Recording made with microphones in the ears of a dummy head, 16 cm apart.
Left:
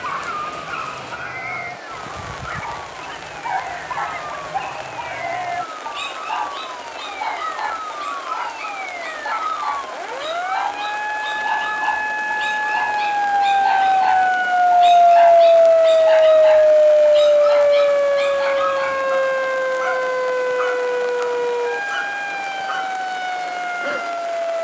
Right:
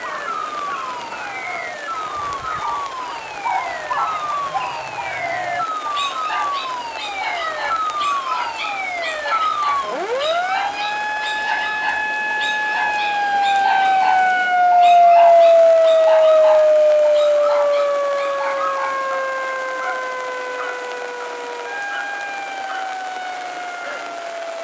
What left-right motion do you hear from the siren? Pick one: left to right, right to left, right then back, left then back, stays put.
right to left.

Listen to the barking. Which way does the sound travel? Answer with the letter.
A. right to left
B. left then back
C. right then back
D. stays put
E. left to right
C.